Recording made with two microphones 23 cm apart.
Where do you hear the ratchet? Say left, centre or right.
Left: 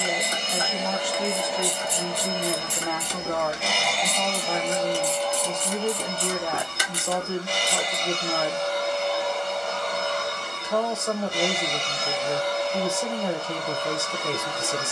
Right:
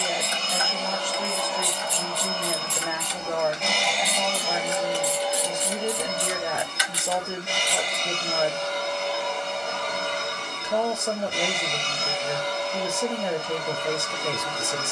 left.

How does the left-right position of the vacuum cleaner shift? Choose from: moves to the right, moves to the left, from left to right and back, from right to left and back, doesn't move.
moves to the right.